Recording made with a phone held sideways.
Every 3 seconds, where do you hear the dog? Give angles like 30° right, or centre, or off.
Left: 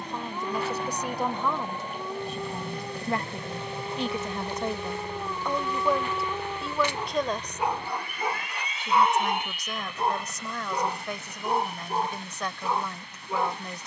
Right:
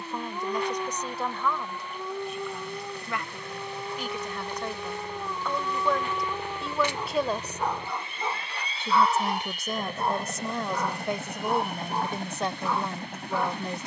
10° right, centre, 10° left, 20° left, 20° left.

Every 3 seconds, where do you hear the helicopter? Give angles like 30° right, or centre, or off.
50° left, 20° left, 20° right, 50° right, 60° right.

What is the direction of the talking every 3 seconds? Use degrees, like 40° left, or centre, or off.
20° left, 30° left, 10° right, 30° right, 30° right.